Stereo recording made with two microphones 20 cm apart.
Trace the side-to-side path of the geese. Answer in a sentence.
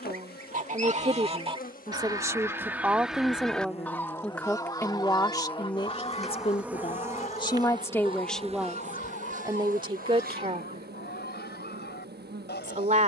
You can hear the geese move from right to left.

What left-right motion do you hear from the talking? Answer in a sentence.
In this clip you hear the talking go left and come back.